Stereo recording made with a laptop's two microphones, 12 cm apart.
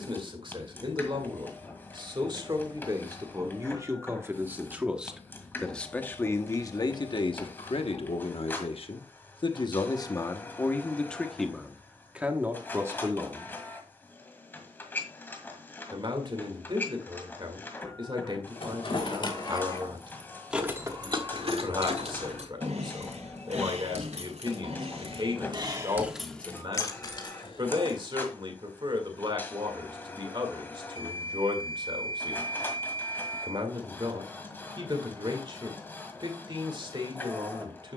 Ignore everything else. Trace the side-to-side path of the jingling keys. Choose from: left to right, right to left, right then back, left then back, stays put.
right then back.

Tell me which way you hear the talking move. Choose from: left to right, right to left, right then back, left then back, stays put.
left then back.